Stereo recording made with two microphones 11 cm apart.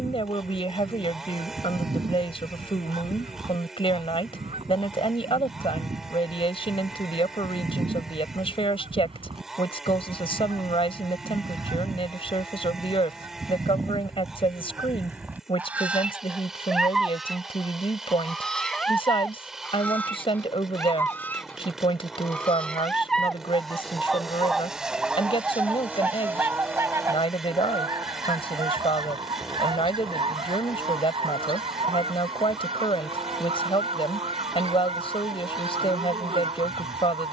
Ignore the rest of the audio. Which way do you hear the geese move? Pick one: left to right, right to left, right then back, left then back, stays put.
left then back.